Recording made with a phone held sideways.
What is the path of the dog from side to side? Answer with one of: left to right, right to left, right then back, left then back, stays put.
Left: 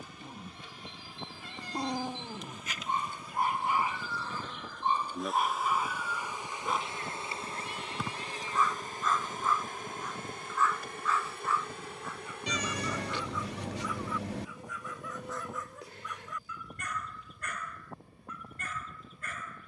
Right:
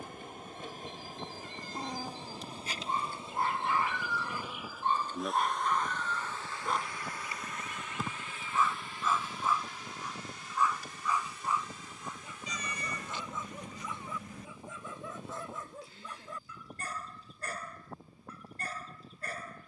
left to right.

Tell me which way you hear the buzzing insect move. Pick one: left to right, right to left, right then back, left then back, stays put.
right to left.